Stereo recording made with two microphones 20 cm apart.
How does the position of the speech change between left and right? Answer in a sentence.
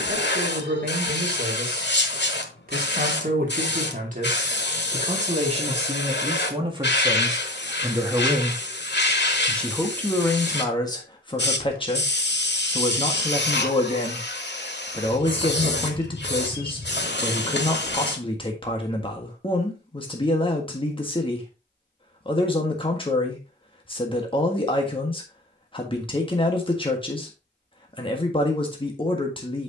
In this clip you hear the speech go from the right side to the left.